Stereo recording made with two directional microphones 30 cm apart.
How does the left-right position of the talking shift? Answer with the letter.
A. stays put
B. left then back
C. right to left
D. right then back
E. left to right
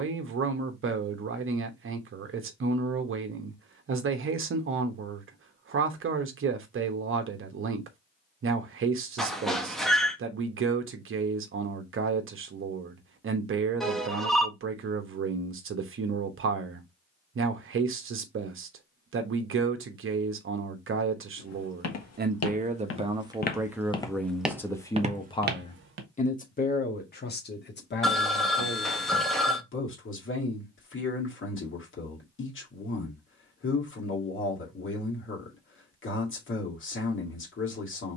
C.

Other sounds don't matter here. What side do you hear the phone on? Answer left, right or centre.
centre.